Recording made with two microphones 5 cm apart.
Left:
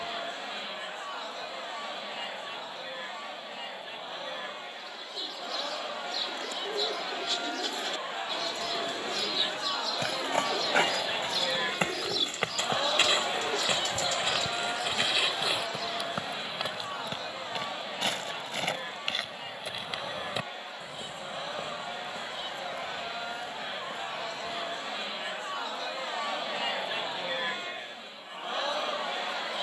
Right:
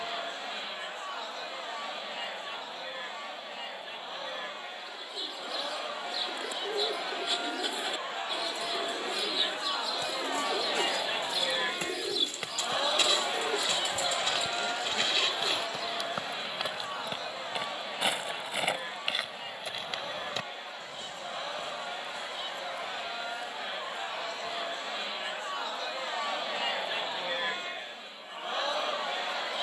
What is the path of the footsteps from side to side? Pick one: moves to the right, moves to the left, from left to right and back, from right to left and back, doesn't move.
from left to right and back.